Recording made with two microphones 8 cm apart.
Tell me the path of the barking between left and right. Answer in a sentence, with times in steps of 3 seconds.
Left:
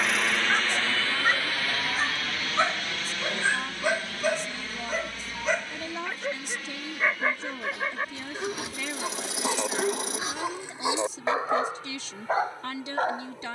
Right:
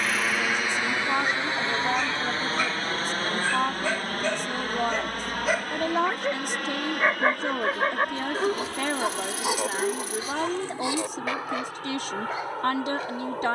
In this clip you hear the barking on the left from 0 s, in the centre from 3 s, on the right from 6 s, in the centre from 9 s and on the left from 12 s.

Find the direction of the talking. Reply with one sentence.
You can hear the talking on the right.